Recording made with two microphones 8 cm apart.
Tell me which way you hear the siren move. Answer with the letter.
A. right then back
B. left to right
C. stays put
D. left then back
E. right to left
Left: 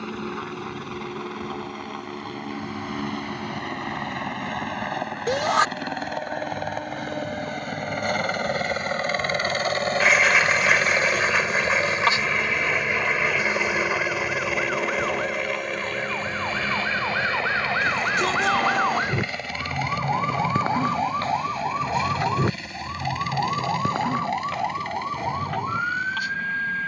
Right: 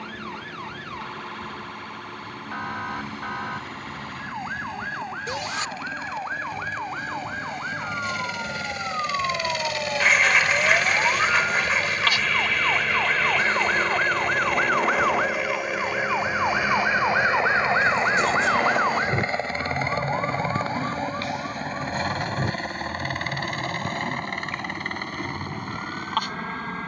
E.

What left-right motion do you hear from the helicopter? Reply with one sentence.
In this clip you hear the helicopter move to the right.